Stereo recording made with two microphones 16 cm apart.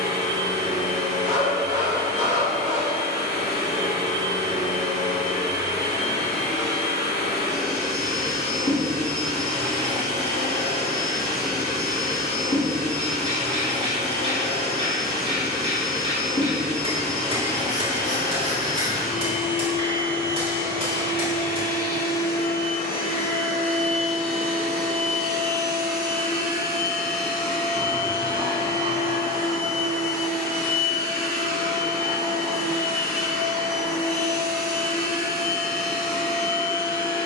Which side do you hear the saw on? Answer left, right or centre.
right.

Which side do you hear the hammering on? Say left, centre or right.
right.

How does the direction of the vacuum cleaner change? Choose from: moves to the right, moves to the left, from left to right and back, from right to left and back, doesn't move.
doesn't move.